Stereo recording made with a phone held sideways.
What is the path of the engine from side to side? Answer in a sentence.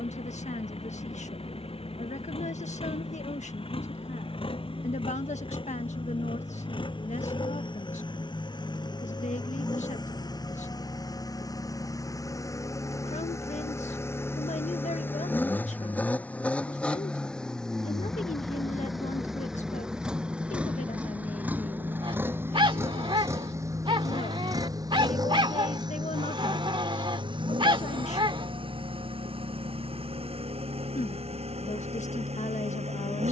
You can hear the engine travel towards the right.